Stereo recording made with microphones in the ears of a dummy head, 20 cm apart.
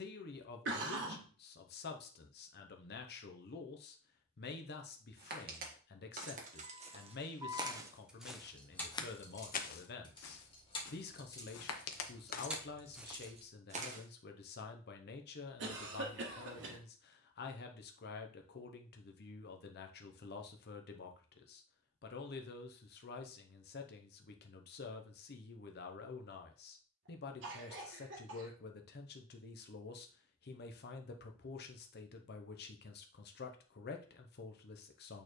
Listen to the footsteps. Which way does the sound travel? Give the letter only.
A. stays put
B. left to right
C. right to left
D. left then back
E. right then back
D.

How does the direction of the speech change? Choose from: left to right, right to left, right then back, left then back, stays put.
stays put.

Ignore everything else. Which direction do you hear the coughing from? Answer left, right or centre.
right.